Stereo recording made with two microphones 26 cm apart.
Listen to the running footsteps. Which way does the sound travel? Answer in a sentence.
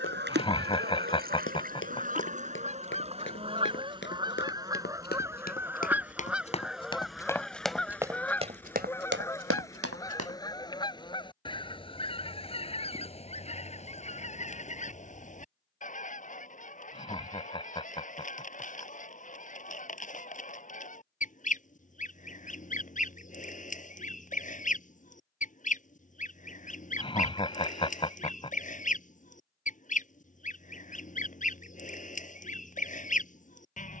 You can hear the running footsteps go from the left side to the right.